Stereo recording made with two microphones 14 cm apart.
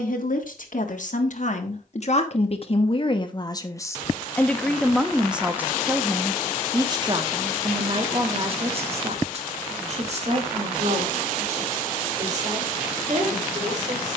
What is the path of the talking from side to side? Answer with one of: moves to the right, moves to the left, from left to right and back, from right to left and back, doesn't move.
moves to the right.